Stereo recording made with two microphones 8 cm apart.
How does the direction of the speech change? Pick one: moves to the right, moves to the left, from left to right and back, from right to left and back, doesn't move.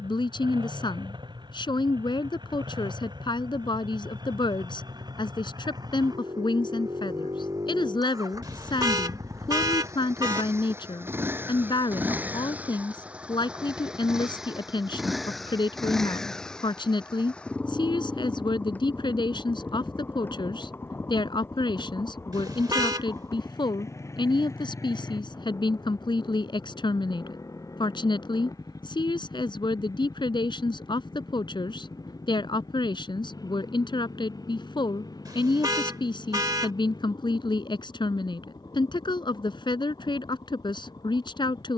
doesn't move.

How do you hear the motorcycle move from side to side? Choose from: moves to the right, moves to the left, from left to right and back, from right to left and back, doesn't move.
moves to the left.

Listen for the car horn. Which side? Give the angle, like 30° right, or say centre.
50° right.